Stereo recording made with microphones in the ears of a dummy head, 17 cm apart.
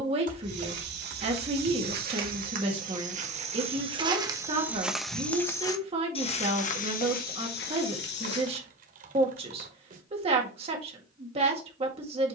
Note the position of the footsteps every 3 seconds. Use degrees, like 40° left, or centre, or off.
50° right, 10° right, 50° left, off.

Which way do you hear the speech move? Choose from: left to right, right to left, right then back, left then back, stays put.
stays put.